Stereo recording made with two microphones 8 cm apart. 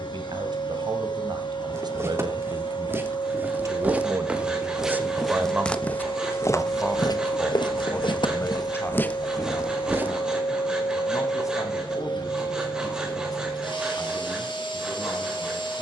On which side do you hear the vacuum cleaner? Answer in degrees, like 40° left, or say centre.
70° left.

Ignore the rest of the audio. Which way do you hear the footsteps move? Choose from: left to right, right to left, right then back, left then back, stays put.
left then back.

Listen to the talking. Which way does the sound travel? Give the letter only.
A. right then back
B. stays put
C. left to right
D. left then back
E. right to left
E.